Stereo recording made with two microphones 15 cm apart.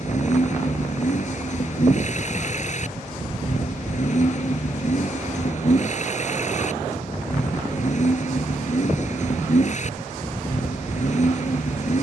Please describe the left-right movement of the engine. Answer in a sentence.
You can hear the engine stay in one place.